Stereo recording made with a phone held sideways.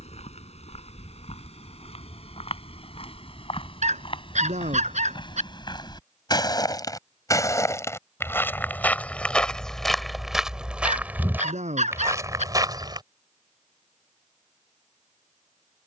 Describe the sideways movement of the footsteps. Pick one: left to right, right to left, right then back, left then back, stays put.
left to right.